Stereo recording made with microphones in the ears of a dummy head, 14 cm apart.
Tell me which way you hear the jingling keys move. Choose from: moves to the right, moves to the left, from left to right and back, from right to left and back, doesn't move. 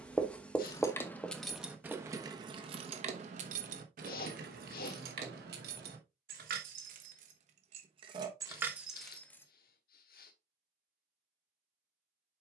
from left to right and back.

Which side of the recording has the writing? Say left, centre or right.
centre.